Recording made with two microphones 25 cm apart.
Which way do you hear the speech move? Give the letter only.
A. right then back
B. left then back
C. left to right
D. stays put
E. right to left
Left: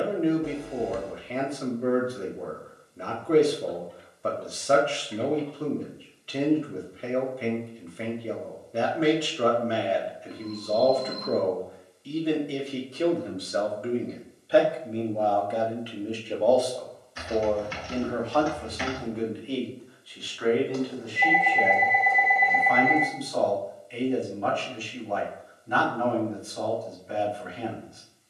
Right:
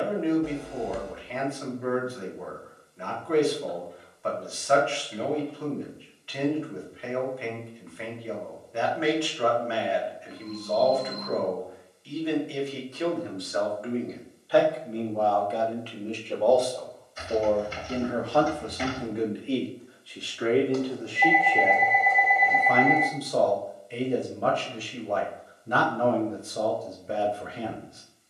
C.